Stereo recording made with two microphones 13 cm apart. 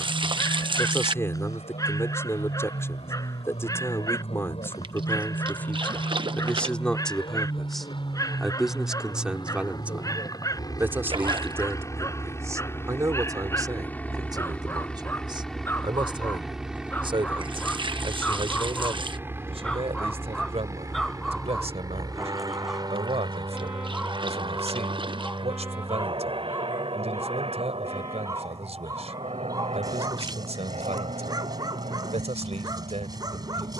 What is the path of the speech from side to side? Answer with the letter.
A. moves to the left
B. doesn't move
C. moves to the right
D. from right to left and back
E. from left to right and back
C.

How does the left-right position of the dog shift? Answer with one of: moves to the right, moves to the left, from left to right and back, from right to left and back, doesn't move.
moves to the right.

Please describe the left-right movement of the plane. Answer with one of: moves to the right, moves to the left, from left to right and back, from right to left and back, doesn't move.
moves to the right.